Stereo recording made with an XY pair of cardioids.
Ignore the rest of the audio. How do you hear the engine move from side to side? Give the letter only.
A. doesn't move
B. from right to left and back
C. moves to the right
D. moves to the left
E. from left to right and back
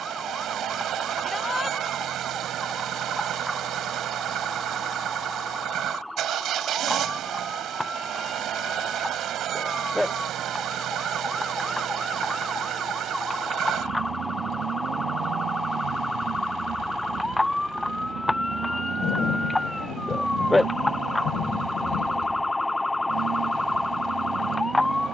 A.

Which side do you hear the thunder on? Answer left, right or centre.
left.